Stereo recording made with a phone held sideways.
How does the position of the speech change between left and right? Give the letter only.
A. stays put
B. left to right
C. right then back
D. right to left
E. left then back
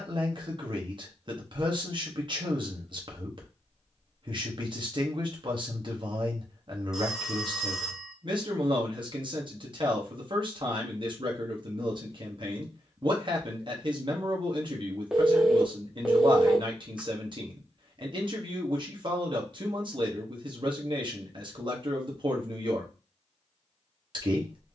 A.